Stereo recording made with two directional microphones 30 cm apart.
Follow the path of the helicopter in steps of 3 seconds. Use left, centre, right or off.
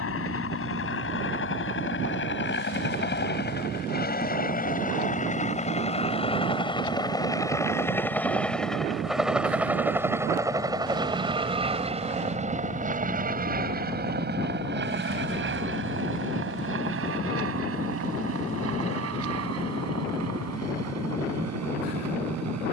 left, left, centre, centre, right, right, right, right.